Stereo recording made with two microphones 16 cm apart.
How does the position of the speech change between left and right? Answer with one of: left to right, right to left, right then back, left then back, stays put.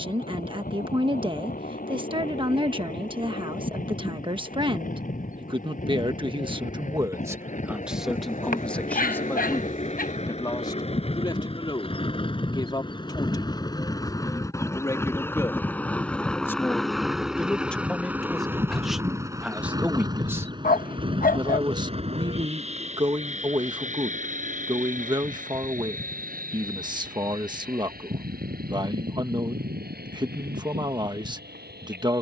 left then back.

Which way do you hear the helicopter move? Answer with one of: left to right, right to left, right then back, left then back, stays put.
left to right.